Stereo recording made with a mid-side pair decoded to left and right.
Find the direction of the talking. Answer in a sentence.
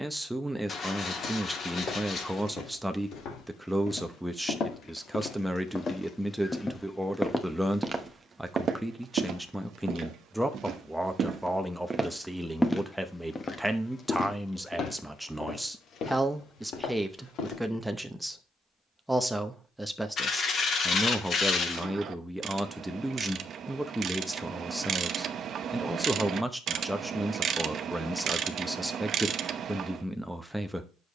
In this clip you hear the talking in the centre.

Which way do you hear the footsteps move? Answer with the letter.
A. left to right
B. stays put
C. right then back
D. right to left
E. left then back
C.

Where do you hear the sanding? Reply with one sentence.
You can hear the sanding on the left.